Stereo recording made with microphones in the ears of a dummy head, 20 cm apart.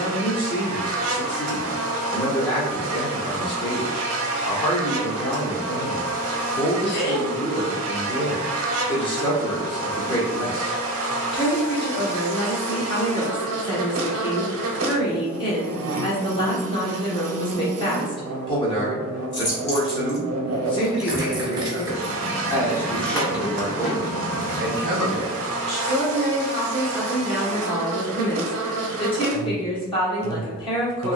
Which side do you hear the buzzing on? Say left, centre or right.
right.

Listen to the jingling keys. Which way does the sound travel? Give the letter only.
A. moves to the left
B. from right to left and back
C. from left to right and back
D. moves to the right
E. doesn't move
C.